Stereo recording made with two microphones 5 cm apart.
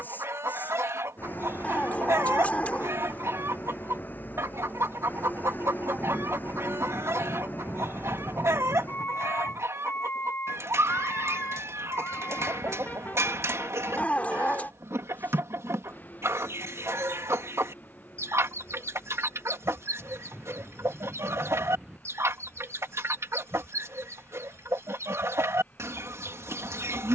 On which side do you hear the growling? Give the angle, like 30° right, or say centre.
30° left.